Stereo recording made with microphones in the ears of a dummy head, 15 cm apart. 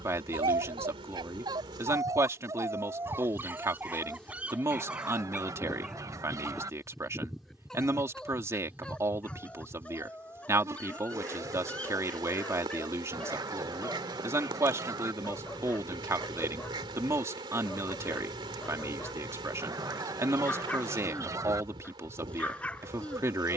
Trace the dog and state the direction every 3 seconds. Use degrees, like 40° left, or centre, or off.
20° right, 10° right, centre, 10° left, 10° left, 10° left, 10° left, 10° left.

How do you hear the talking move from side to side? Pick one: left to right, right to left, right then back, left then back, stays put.
stays put.